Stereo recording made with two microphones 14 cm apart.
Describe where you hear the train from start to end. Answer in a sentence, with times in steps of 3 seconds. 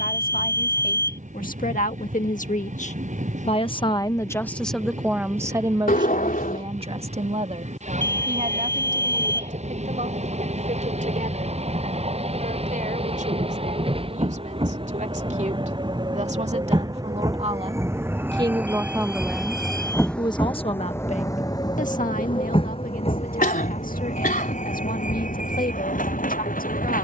In this clip you hear the train on the right from 0 s, in the centre from 18 s and on the left from 21 s.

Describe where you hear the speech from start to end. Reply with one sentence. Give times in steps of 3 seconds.
In this clip you hear the speech on the left from 0 s, in the centre from 3 s, on the right from 6 s, in the centre from 18 s and on the left from 21 s.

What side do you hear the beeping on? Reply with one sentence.
In this clip you hear the beeping on the left.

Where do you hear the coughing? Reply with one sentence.
In this clip you hear the coughing on the left.